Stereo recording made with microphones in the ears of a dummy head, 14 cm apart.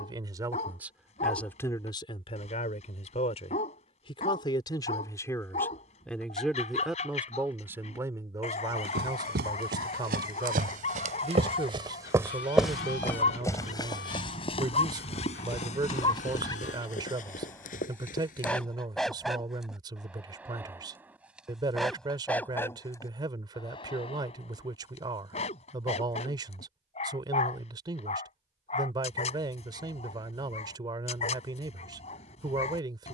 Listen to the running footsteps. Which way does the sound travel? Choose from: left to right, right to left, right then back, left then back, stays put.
right to left.